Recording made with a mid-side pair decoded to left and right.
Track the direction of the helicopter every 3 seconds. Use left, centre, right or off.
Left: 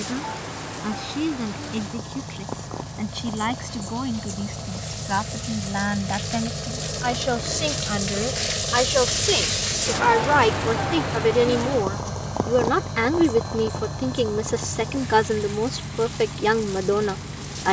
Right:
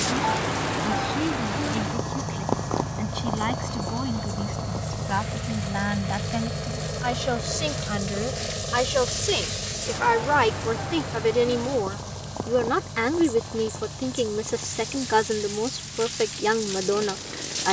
right, right, centre, left, left, left.